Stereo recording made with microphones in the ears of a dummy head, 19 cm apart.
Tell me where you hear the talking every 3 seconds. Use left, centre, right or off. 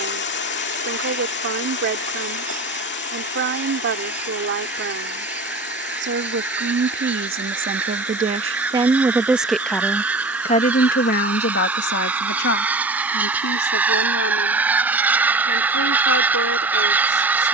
right, right, right, left, left, left.